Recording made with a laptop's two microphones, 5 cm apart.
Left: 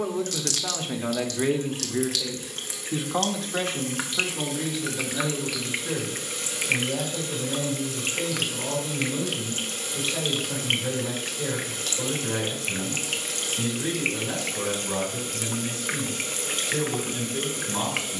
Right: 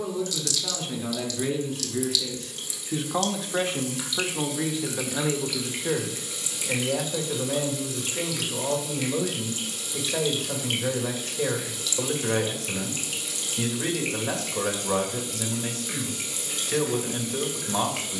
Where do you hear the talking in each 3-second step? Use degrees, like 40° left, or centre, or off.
30° left, 20° right, 50° right, 50° right, 50° right, 50° right.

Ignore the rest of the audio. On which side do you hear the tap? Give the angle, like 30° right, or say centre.
50° left.